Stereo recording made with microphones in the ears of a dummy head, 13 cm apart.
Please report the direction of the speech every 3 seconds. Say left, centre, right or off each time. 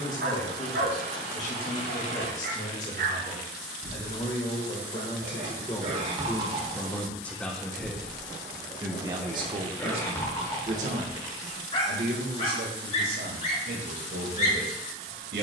left, left, centre, right, right.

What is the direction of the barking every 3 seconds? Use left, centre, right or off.
right, right, right, left, left.